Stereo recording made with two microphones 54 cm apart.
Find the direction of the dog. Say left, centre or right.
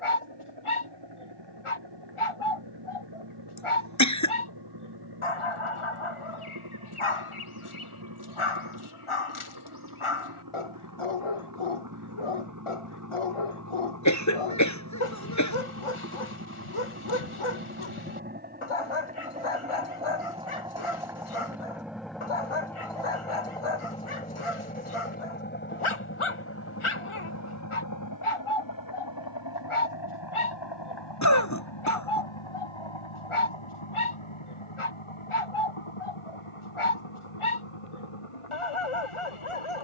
left.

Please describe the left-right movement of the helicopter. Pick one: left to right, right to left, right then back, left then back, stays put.
right to left.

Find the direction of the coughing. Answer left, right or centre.
left.